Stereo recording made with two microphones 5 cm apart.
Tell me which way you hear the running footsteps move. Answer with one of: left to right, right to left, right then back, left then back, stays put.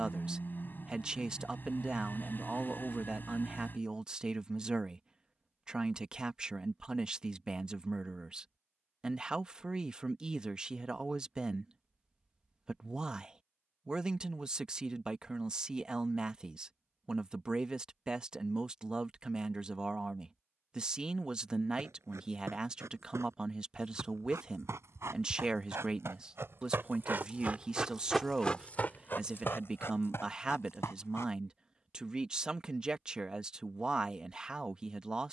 right to left.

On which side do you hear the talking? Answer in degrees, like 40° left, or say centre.
20° right.